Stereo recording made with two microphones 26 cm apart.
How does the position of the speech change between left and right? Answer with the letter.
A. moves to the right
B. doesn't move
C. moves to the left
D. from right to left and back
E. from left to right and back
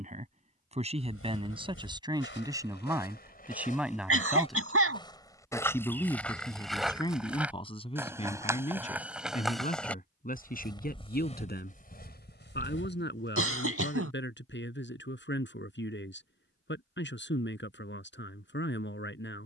C.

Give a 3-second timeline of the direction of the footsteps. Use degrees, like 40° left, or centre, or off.
50° left, 20° left, centre, 10° left, 40° left, off, off.